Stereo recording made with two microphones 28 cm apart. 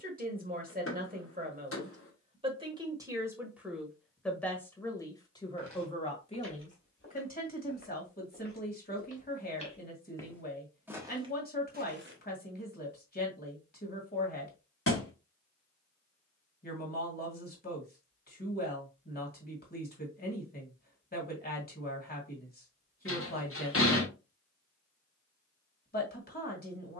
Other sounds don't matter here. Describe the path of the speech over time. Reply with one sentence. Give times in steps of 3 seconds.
You can hear the speech on the right from 0 s, in the centre from 3 s and on the left from 6 s.